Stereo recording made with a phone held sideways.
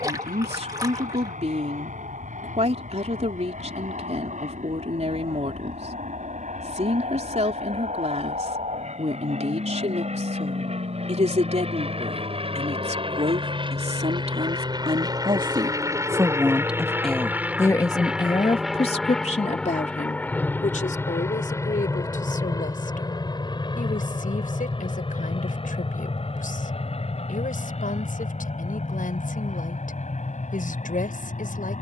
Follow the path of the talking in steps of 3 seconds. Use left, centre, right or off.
right, right, right, right, right, centre, left, left, left, left, left.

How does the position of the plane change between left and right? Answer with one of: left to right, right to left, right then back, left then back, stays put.
right to left.